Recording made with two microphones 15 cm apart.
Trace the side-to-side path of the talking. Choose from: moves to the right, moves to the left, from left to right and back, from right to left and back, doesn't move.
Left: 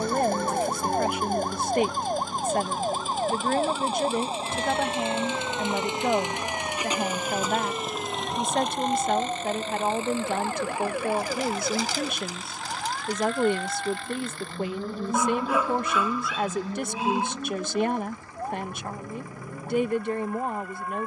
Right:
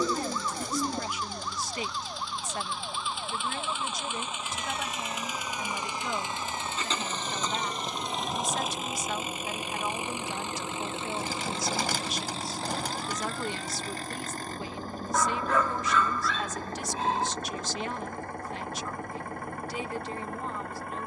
doesn't move.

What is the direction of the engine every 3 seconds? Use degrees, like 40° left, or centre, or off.
50° left, 30° left, 10° left, 20° right, 40° right, 50° right, 60° right.